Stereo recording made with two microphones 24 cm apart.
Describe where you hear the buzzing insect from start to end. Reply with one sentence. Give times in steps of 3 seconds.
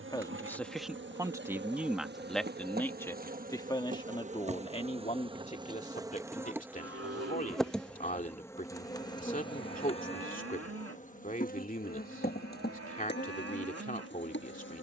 You can hear the buzzing insect on the right from 0 s, in the centre from 6 s and on the left from 9 s.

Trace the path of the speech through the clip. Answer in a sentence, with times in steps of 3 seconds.
In this clip you hear the speech in the centre from 0 s and on the left from 3 s.